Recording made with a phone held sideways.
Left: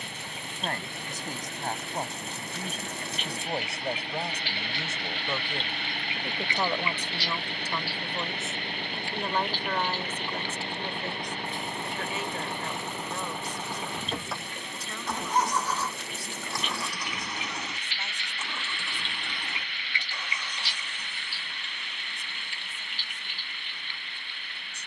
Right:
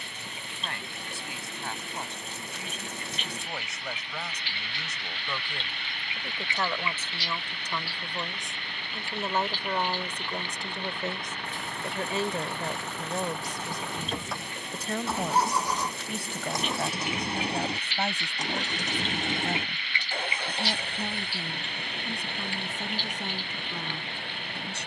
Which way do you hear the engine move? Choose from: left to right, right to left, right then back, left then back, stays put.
left to right.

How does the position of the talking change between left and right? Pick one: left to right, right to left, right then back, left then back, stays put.
left to right.